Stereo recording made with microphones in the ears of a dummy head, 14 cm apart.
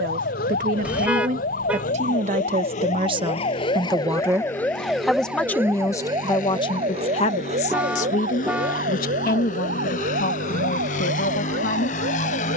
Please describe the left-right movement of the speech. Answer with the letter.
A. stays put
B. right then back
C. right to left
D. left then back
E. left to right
C.